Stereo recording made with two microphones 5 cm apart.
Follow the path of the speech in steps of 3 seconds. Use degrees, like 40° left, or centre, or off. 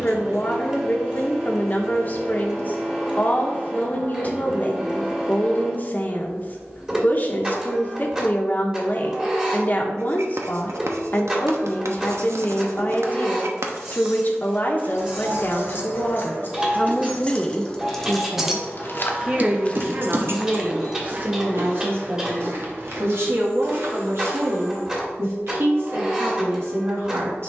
40° left, 40° left, 40° left, 40° left, 40° left, 30° left, 30° right, 60° right, 60° right.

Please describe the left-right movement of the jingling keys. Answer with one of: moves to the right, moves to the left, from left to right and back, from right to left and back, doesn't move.
moves to the right.